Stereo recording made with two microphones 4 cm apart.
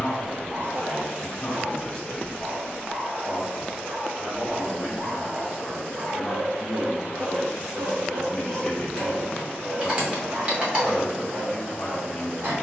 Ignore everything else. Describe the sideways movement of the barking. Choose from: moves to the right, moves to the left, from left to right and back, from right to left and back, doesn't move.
doesn't move.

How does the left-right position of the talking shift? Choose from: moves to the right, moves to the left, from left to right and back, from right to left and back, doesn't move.
from left to right and back.